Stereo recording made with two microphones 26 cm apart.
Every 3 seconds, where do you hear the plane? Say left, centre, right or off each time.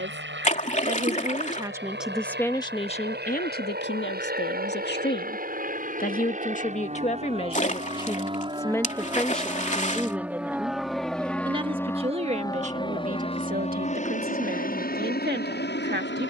right, right, right, centre, left, left.